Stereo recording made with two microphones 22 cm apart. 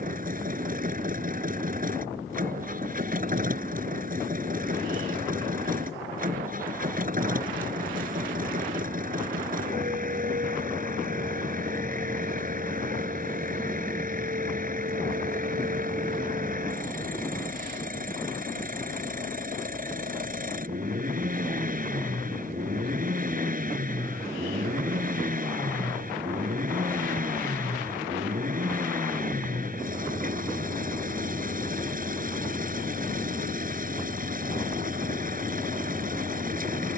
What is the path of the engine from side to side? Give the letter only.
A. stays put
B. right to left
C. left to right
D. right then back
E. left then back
A.